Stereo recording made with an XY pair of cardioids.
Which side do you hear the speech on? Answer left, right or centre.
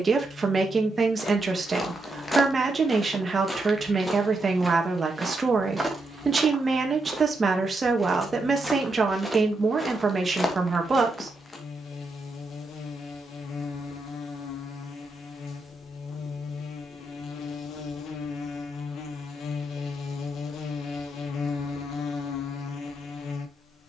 right.